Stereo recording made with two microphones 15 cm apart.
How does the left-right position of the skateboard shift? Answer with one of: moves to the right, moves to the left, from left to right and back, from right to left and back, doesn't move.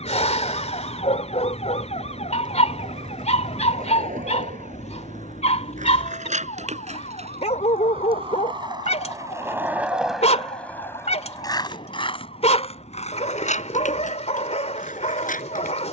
moves to the left.